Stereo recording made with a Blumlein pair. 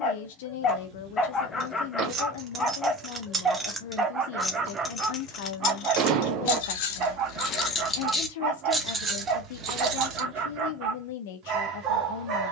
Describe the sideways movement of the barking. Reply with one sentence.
In this clip you hear the barking move from left to right.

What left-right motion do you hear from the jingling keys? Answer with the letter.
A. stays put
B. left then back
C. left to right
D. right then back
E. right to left
B.